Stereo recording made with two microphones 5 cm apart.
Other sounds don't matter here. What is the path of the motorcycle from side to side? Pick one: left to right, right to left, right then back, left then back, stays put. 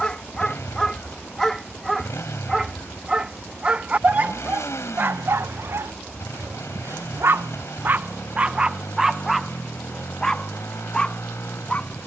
stays put.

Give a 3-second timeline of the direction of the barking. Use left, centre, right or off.
centre, right, right, centre.